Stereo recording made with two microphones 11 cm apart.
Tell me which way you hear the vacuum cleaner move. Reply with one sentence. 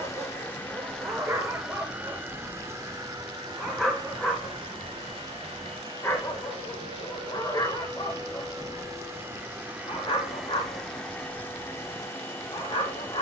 You can hear the vacuum cleaner go right and come back.